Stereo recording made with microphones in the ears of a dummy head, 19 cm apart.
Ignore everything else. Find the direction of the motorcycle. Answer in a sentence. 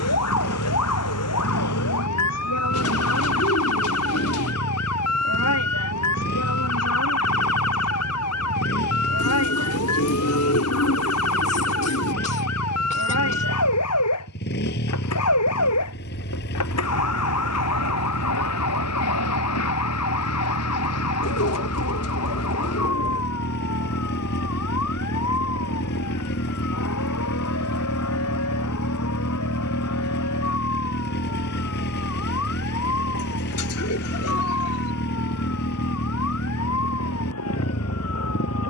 You can hear the motorcycle on the left.